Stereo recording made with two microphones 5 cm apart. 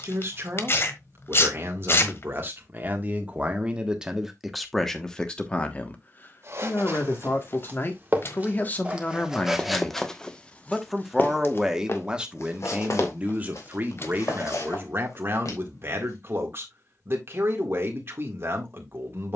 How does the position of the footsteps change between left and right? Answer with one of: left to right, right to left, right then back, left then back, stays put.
right to left.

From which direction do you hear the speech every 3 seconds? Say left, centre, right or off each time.
right, centre, left, centre, right, right, right.